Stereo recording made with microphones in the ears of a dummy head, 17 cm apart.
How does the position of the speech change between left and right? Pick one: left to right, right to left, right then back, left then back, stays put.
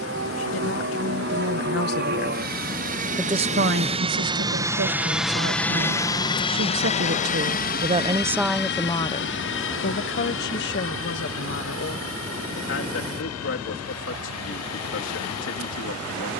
right then back.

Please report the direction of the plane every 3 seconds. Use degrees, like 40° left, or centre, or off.
60° right, 20° right, 40° left, 60° left, 70° left, 70° left.